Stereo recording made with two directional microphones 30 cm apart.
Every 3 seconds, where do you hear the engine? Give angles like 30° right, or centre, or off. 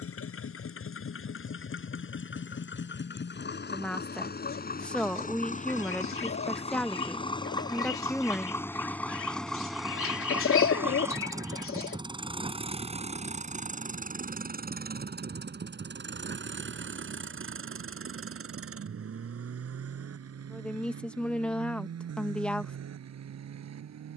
40° left, 30° left, 10° left, centre, 20° right, 40° right, 50° right, 60° right.